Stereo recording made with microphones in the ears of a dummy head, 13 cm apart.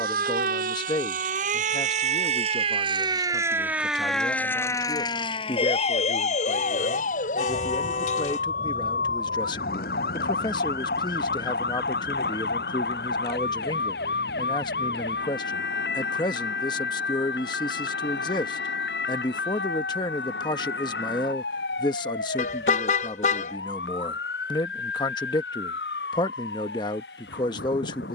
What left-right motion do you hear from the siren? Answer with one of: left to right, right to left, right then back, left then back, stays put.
right to left.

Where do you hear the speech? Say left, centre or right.
left.